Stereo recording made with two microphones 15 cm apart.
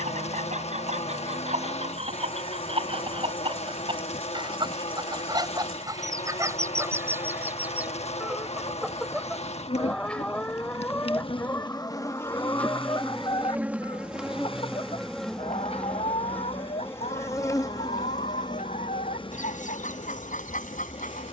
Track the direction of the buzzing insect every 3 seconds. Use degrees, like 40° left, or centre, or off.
40° left, 40° left, 40° left, 40° left, centre, 10° left, 30° left.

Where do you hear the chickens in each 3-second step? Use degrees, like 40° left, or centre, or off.
40° right, 30° right, 10° right, 10° left, 30° left, 50° left, 50° left.